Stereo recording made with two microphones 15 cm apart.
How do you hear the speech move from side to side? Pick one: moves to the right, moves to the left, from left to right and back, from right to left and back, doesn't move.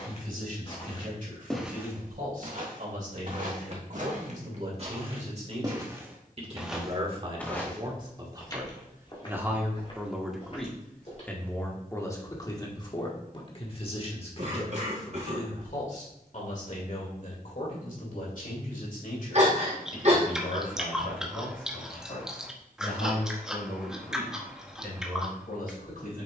moves to the left.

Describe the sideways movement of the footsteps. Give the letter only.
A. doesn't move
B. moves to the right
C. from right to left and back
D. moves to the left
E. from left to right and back
E.